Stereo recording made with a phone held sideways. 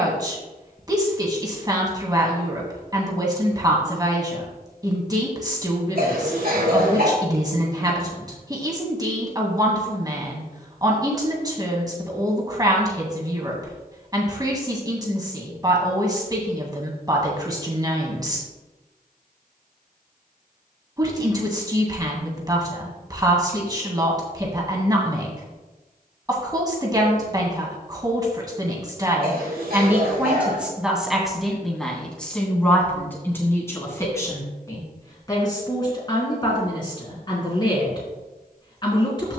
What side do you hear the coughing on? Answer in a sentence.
You can hear the coughing on the right.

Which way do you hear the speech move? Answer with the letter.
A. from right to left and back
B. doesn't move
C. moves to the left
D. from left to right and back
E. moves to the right
C.